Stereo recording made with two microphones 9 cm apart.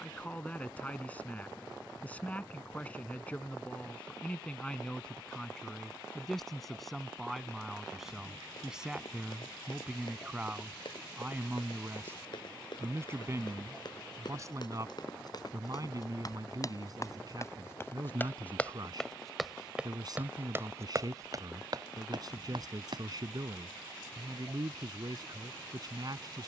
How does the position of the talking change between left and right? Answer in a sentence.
You can hear the talking go from the left side to the right.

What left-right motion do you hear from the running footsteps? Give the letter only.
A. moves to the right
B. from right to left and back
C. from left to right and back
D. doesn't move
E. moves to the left
A.